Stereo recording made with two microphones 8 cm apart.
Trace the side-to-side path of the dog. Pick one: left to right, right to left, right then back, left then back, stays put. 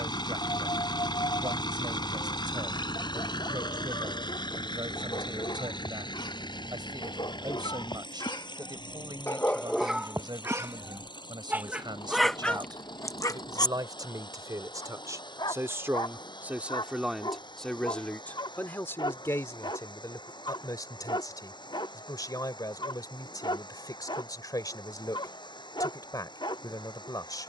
right then back.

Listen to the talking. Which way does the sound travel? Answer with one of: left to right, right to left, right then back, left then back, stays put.
right to left.